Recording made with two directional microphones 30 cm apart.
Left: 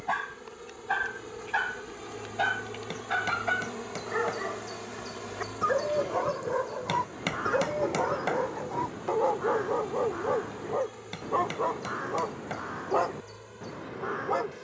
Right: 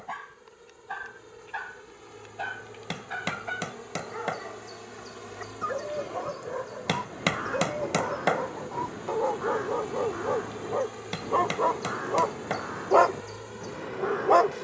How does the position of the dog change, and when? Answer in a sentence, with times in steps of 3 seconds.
You can hear the dog on the left from 0 s, in the centre from 9 s and on the right from 12 s.